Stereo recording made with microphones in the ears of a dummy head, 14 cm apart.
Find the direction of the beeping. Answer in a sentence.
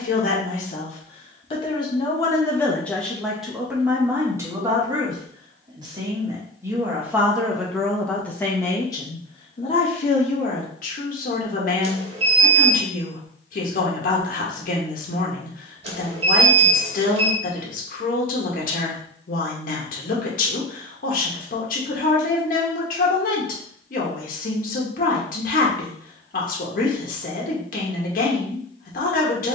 In this clip you hear the beeping on the right.